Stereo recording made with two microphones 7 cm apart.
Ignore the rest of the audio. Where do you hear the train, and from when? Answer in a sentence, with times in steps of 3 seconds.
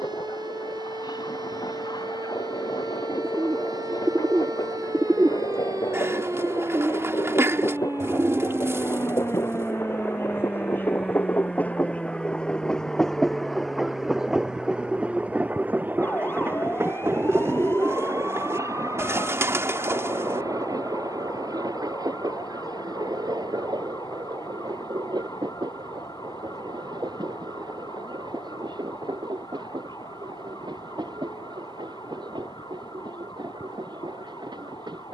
In this clip you hear the train on the left from 0 s, in the centre from 12 s and on the right from 15 s.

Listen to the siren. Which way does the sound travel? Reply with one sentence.
In this clip you hear the siren move to the left.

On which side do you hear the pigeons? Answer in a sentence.
In this clip you hear the pigeons on the right.